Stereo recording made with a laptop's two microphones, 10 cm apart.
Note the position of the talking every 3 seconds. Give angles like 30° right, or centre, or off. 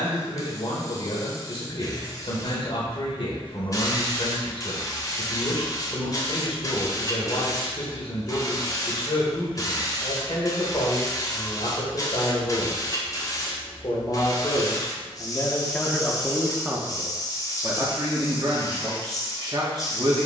50° left, 50° left, 50° left, 50° left, 50° left, centre, 40° right.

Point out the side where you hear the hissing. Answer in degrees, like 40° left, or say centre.
30° left.